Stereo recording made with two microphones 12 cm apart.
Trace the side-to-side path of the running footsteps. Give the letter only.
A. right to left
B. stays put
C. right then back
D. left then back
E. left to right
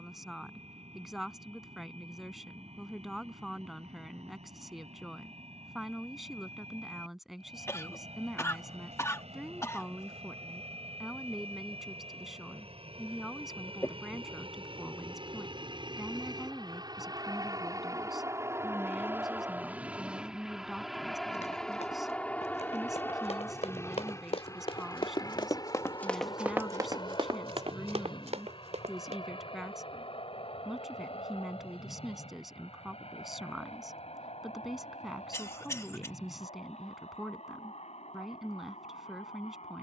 E.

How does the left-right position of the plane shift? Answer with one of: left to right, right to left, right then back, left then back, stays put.
right to left.